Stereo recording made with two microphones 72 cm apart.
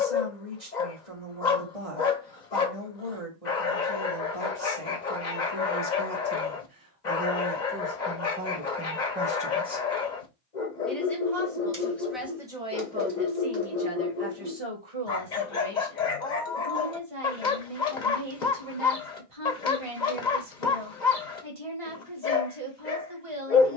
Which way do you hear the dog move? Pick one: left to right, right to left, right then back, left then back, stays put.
stays put.